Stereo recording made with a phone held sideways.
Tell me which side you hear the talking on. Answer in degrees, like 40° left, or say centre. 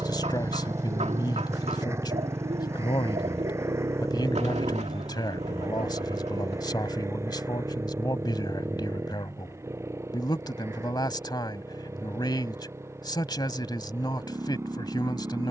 30° left.